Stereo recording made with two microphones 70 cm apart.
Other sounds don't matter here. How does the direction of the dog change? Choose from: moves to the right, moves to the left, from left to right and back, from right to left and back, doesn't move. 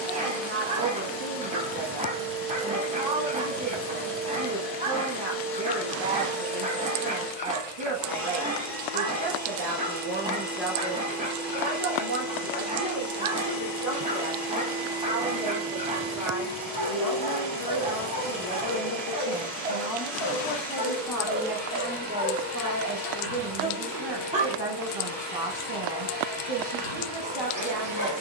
doesn't move.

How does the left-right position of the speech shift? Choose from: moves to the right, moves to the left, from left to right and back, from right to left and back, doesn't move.
from right to left and back.